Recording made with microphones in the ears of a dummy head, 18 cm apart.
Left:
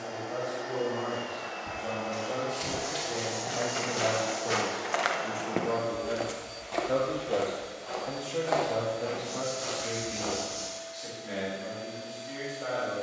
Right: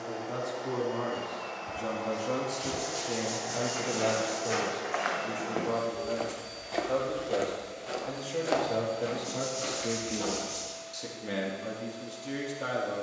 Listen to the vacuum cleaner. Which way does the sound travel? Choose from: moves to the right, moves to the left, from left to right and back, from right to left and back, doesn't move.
from left to right and back.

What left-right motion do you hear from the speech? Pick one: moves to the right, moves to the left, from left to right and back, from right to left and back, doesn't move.
from right to left and back.